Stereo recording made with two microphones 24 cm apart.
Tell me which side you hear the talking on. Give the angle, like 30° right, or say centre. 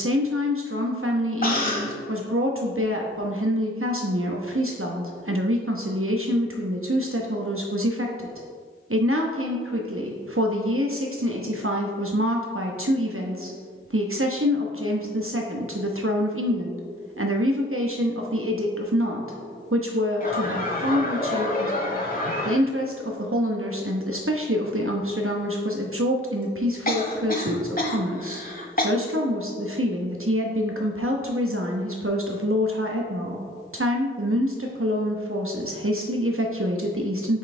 70° right.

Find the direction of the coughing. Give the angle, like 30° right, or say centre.
40° left.